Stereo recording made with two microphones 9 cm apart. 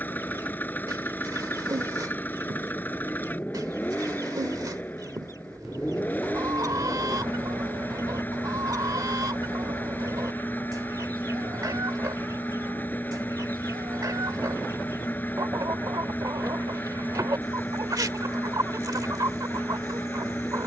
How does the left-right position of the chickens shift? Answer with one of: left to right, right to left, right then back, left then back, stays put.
stays put.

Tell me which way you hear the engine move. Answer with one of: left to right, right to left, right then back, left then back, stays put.
stays put.